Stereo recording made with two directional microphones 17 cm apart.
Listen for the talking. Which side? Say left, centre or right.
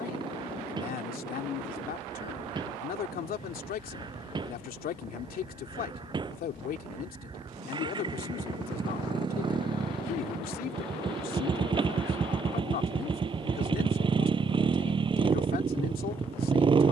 left.